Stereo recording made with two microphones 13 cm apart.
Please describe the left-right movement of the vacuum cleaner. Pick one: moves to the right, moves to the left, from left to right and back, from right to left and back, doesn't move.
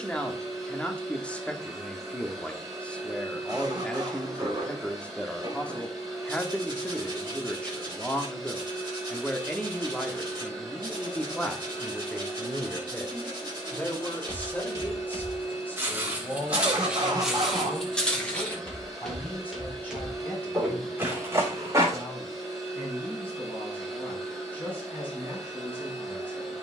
doesn't move.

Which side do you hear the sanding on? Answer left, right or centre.
right.